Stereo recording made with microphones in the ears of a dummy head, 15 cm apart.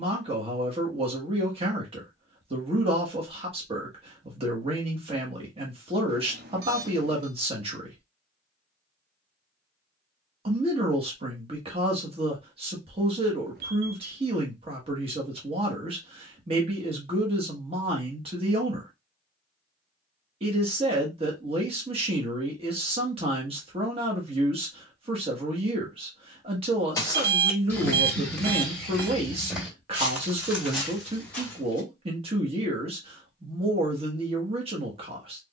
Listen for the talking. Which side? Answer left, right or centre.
right.